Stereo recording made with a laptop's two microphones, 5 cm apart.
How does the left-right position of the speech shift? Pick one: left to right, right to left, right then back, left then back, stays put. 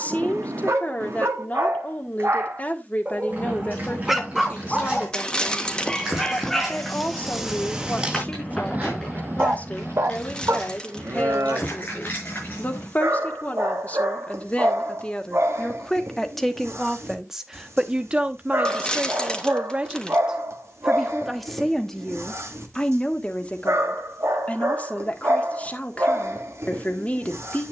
right then back.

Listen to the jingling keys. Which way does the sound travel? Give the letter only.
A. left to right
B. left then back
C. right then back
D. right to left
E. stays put
D.